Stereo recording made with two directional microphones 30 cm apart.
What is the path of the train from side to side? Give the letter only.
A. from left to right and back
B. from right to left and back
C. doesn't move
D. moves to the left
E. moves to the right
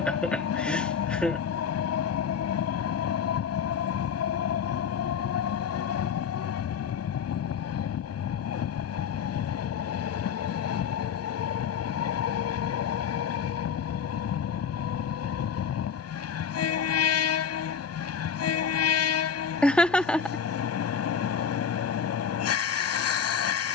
C.